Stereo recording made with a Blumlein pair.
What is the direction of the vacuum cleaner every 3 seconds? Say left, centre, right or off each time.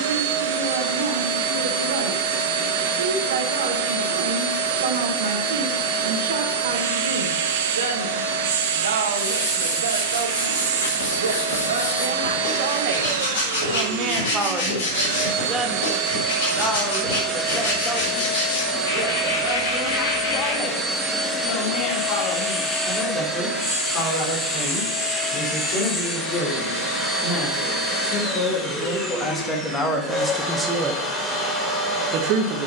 right, right, right, right, right, right, centre, centre, centre, centre, centre.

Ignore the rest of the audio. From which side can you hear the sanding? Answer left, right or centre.
left.